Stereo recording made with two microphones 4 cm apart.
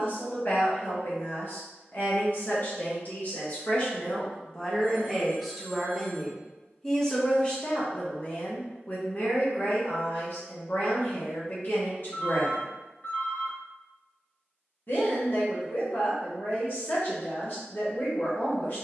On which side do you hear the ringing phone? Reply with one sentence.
In this clip you hear the ringing phone on the left.